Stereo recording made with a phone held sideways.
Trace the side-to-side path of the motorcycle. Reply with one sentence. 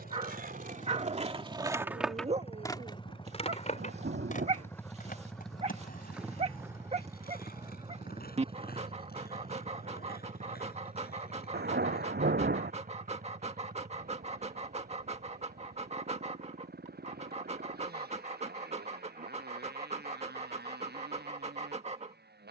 In this clip you hear the motorcycle move to the right.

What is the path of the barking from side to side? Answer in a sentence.
In this clip you hear the barking stay in one place.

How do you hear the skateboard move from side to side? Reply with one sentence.
You can hear the skateboard go from the right side to the left.